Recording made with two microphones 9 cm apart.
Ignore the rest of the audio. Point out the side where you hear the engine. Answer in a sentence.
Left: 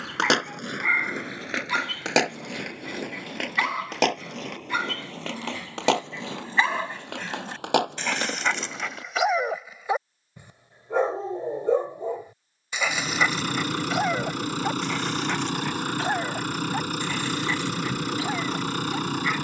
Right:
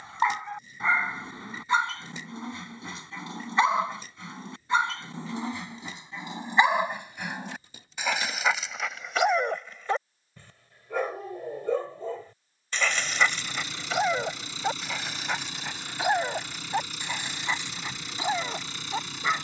In this clip you hear the engine on the left.